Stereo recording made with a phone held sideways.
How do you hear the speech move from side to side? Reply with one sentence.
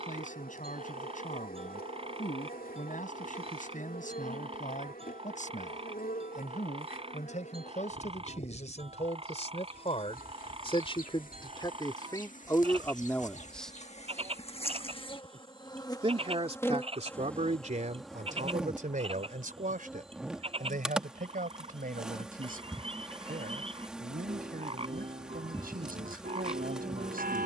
You can hear the speech go from the left side to the right.